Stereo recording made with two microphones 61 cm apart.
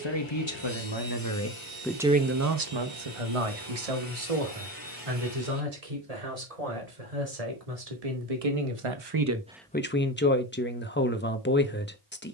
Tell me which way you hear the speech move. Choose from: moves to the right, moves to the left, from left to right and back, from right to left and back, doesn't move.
from left to right and back.